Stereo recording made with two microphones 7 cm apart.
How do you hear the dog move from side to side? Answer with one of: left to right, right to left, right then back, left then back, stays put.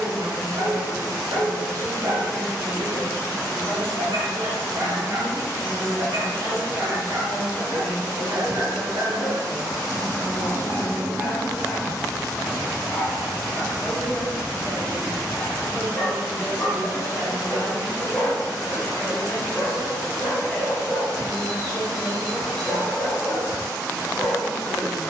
right to left.